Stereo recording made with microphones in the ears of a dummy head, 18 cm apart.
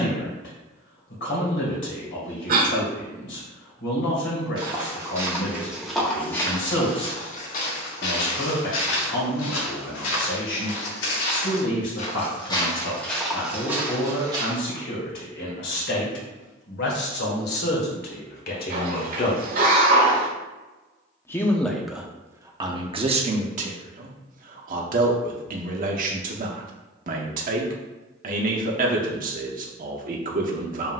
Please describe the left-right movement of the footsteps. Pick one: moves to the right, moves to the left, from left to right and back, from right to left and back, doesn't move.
from right to left and back.